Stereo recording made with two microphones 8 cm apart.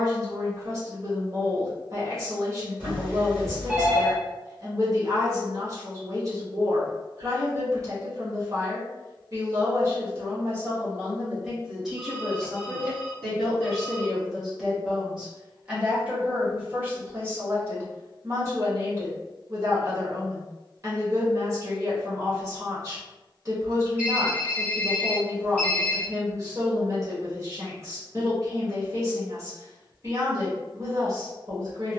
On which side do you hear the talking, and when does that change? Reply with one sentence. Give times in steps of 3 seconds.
In this clip you hear the talking on the right from 0 s, in the centre from 12 s and on the right from 15 s.